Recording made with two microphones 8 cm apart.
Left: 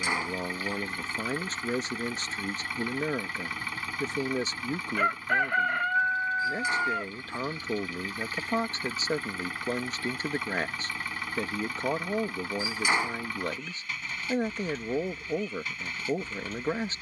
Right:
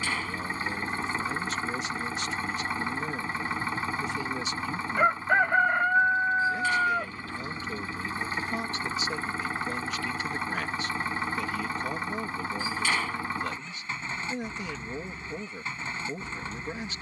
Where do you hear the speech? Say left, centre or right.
left.